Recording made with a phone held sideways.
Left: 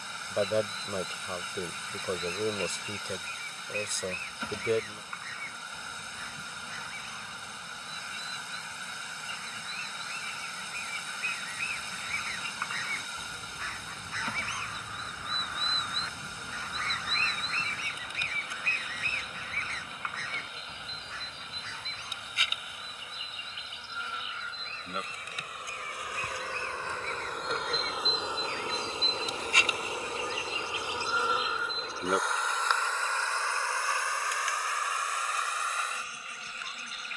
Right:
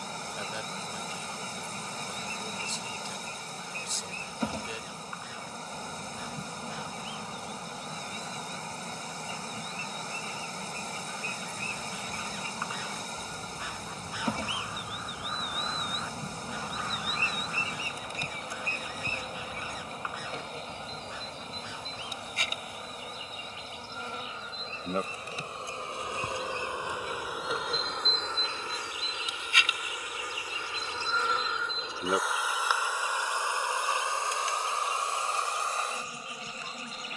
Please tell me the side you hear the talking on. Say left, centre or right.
left.